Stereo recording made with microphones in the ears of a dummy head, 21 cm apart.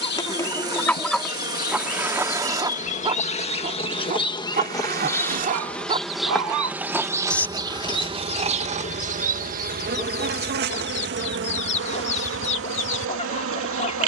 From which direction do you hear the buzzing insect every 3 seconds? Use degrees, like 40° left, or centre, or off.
40° left, 20° left, 20° right, 50° right, 60° right.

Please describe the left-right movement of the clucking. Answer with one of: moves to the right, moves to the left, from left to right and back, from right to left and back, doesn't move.
from left to right and back.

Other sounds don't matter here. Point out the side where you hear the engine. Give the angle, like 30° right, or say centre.
20° right.